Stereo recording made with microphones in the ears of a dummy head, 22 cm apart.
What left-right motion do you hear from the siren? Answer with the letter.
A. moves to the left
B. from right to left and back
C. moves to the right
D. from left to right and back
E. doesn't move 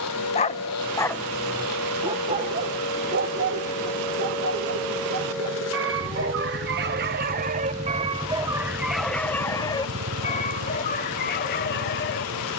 C.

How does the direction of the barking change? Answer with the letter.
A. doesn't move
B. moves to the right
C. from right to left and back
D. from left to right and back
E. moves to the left
D.